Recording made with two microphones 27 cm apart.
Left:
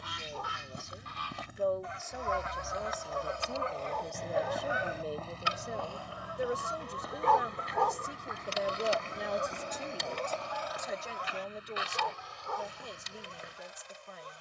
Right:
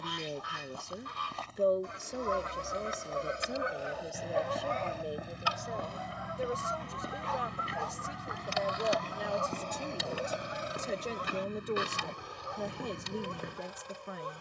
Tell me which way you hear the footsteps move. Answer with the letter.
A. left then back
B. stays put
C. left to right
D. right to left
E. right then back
C.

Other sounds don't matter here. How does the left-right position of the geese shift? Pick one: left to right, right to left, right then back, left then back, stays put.
left then back.